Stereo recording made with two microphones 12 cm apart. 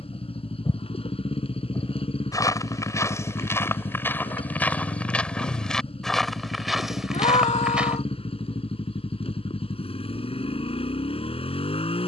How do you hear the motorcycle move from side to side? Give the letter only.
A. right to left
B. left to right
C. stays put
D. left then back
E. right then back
C.